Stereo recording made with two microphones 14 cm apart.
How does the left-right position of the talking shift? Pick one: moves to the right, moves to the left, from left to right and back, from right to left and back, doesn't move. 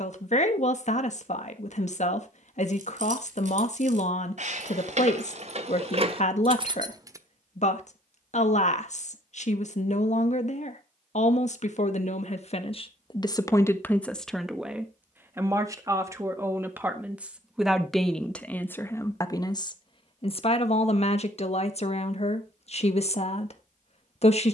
from left to right and back.